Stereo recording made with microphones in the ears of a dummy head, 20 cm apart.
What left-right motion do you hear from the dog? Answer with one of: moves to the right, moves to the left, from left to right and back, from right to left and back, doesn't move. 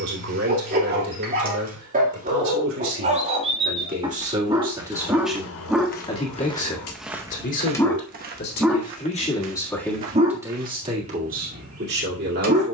from right to left and back.